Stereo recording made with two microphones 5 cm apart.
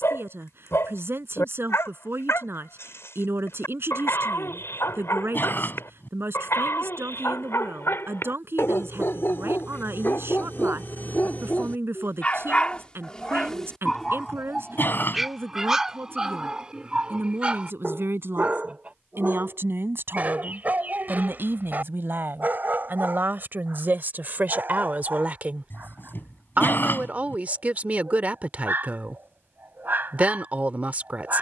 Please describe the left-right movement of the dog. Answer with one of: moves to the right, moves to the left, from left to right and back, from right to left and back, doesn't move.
moves to the right.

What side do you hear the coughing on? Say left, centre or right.
left.